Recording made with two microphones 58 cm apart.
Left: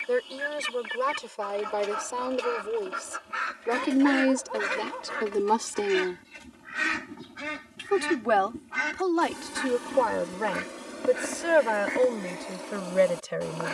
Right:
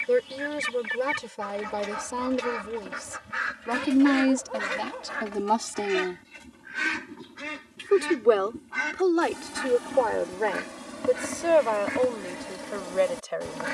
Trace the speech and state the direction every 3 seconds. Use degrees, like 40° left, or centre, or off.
40° right, 20° right, 10° left, 30° left, 50° left.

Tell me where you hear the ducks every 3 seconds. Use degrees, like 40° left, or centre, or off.
40° right, 30° right, 10° left, 20° right, 40° right.